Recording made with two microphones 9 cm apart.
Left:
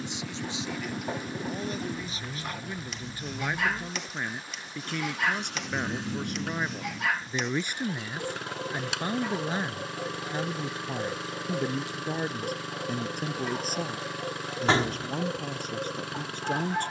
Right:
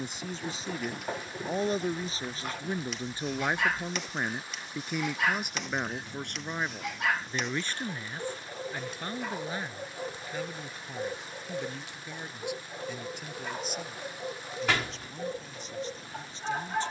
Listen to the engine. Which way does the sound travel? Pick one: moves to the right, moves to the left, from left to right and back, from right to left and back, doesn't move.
doesn't move.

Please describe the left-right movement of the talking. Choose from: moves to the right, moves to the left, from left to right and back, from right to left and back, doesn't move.
moves to the left.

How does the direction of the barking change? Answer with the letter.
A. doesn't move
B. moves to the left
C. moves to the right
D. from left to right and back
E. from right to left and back
A.